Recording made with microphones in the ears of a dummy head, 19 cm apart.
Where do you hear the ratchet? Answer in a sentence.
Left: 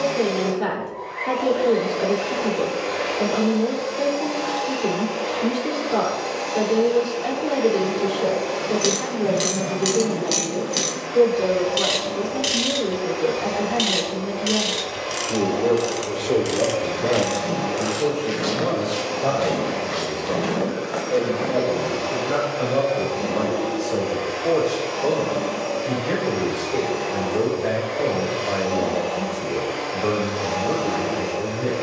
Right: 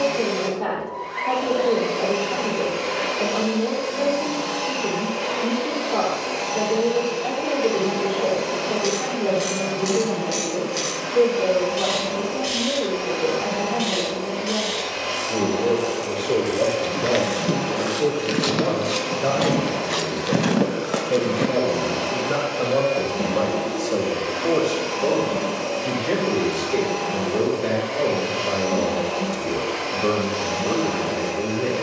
In this clip you hear the ratchet on the left.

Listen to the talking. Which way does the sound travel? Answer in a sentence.
In this clip you hear the talking move from left to right.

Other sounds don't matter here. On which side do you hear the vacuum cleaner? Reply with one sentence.
You can hear the vacuum cleaner on the right.